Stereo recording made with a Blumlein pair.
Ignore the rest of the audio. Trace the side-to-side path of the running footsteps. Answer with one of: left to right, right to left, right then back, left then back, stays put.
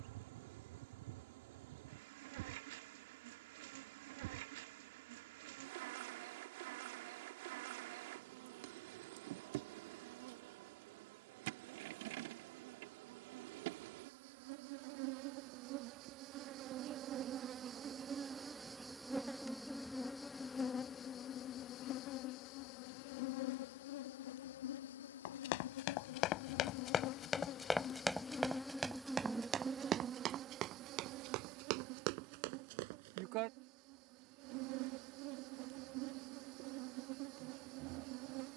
left to right.